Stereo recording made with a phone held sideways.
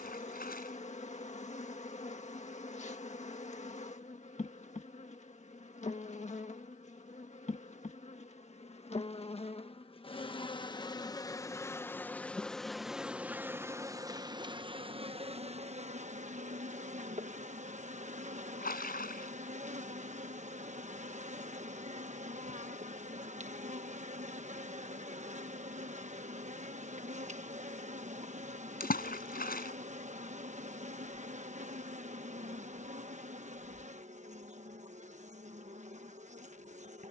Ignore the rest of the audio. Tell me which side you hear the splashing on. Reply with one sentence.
In this clip you hear the splashing on the left.